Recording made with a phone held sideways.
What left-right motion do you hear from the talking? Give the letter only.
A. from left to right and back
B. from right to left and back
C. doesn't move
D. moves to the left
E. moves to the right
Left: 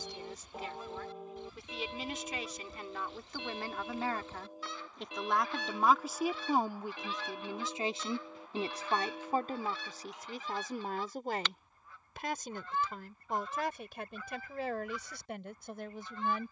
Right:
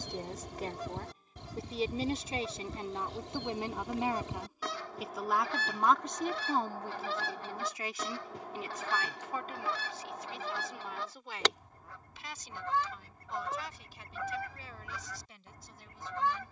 D.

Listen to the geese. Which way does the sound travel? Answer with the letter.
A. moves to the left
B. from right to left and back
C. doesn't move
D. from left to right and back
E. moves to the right
C.